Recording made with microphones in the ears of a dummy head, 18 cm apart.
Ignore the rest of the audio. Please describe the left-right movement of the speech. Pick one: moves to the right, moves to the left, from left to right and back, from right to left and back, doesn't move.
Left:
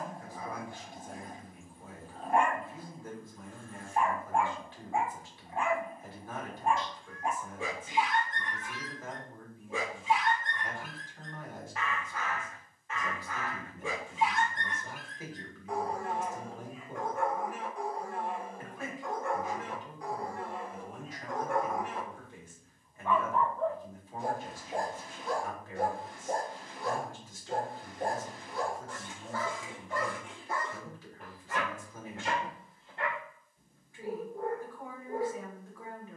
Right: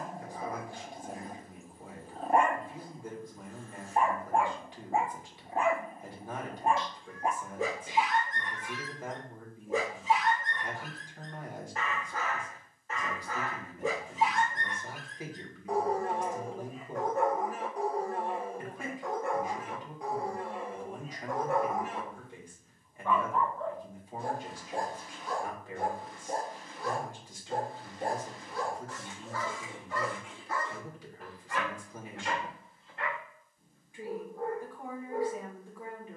doesn't move.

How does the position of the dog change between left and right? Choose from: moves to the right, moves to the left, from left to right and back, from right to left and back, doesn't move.
moves to the left.